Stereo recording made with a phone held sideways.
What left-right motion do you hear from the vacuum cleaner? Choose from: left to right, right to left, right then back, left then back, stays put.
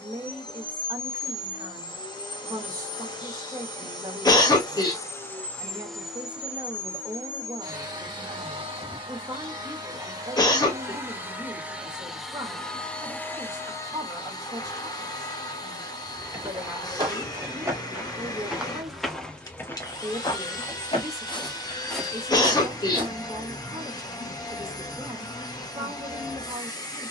right then back.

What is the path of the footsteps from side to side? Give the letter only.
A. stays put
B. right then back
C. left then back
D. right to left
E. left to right
C.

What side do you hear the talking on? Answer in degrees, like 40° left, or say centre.
20° right.